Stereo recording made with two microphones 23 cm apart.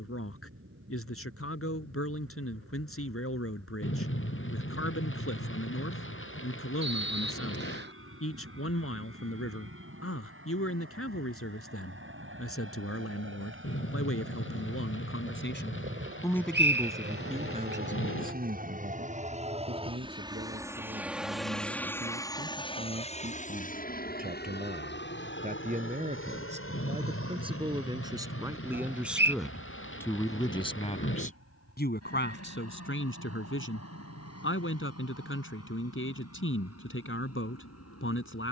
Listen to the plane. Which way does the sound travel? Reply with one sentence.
You can hear the plane move to the left.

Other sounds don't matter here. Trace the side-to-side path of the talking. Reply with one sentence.
You can hear the talking move from left to right and back again.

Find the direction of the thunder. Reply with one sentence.
In this clip you hear the thunder on the left.